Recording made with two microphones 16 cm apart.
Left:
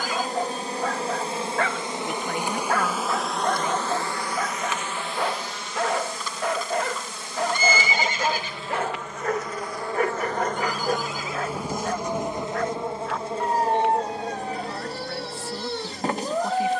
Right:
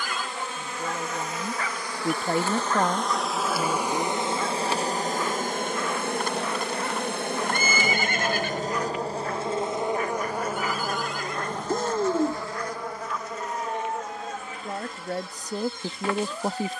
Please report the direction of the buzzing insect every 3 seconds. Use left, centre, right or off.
left, right, right, centre, left, left.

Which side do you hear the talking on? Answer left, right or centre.
right.